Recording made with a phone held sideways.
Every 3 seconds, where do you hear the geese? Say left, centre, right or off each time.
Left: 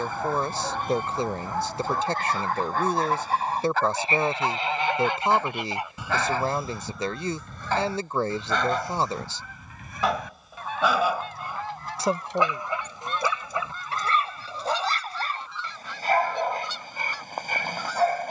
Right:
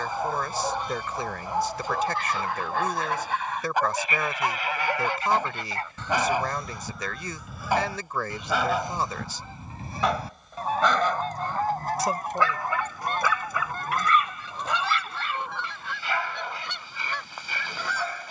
left, left, centre, right, right, right.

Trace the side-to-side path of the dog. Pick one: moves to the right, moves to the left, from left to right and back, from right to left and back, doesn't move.
moves to the left.